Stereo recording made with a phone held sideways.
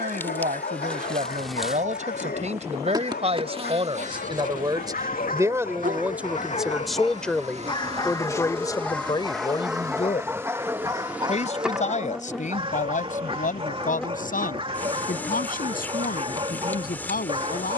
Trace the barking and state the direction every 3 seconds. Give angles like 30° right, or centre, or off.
70° left, 70° left, 30° left, 10° right, 30° right, 30° right.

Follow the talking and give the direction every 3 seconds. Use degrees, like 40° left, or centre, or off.
50° right, 30° right, 10° left, 40° left, 50° left, 60° left.